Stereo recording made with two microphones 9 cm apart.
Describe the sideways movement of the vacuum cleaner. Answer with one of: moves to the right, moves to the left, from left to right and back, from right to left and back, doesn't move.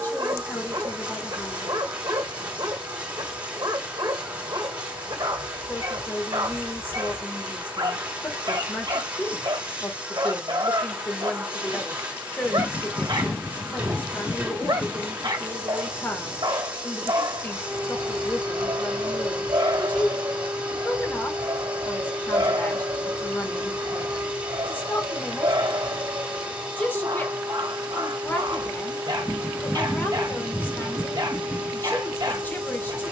doesn't move.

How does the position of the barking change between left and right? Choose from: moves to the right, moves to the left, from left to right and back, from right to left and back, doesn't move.
doesn't move.